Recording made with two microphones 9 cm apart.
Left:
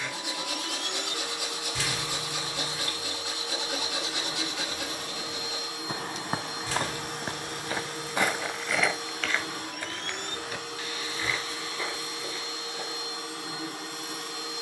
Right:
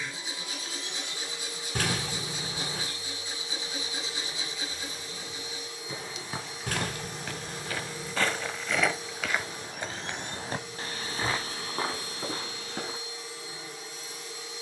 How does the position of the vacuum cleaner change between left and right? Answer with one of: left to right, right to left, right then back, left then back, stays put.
stays put.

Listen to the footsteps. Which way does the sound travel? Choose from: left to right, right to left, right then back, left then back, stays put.
left to right.